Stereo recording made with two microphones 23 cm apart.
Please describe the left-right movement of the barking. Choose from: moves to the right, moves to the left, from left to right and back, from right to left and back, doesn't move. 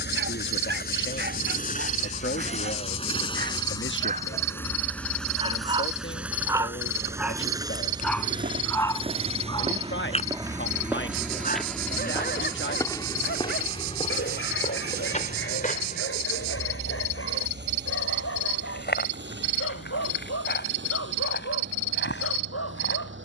moves to the left.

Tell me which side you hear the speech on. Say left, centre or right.
left.